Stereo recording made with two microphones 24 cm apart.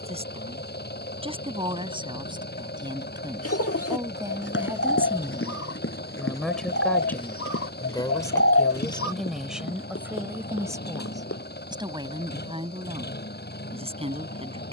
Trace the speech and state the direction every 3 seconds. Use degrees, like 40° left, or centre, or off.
20° right, 10° right, 10° left, 10° right, 20° right.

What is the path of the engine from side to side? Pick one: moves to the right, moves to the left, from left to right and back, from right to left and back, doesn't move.
doesn't move.